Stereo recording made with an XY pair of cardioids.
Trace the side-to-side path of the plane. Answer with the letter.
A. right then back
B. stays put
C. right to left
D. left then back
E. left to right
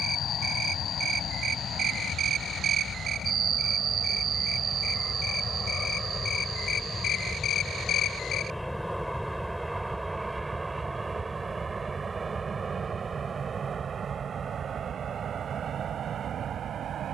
E.